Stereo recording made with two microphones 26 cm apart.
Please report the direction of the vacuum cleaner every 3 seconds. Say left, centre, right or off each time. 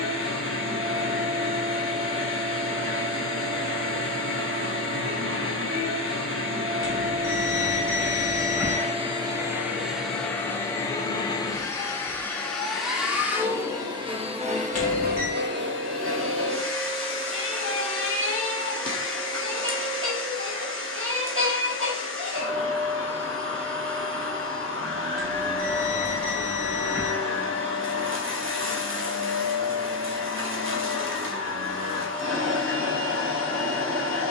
right, right, right, centre, centre, right, right, right, right, right, right, right.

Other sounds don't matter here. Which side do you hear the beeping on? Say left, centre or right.
left.